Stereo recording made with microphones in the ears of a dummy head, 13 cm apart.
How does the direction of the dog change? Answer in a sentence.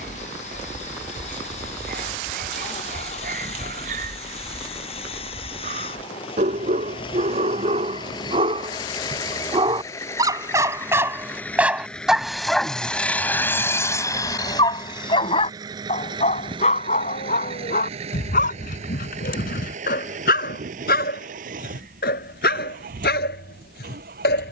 In this clip you hear the dog go from the right side to the left.